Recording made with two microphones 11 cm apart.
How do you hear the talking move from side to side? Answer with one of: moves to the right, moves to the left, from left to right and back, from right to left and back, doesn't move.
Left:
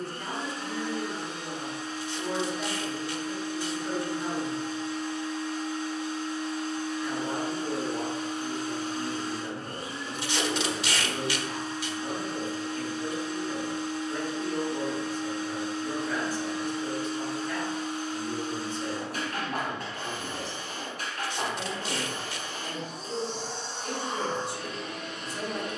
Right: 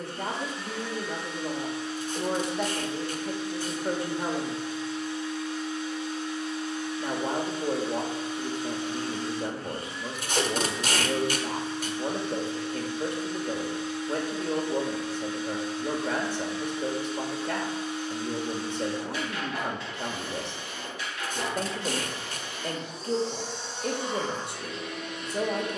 doesn't move.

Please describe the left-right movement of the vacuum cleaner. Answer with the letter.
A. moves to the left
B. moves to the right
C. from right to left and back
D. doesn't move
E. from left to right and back
D.